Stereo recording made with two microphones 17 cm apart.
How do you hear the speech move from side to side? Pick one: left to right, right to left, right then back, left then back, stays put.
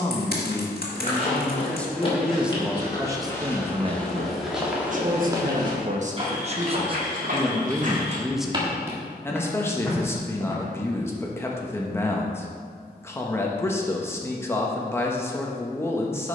right then back.